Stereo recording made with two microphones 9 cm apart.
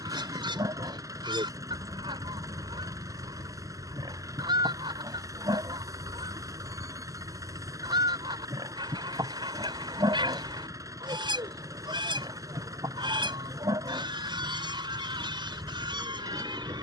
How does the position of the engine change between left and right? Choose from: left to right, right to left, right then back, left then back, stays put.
stays put.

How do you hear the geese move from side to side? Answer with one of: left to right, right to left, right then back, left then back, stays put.
stays put.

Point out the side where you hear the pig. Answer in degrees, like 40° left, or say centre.
50° right.